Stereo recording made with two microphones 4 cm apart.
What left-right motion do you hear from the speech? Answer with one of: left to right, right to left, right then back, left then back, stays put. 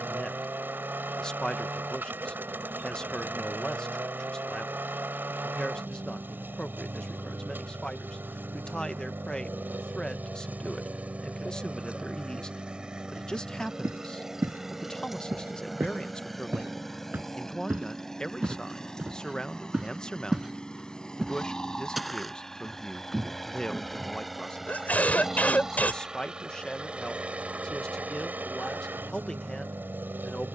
stays put.